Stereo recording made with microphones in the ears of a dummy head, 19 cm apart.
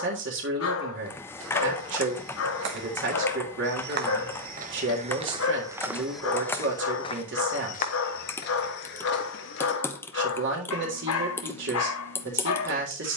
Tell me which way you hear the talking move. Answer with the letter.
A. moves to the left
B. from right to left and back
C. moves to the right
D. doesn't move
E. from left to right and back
D.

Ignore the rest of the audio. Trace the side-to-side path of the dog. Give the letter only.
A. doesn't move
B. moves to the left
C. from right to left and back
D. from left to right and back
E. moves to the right
A.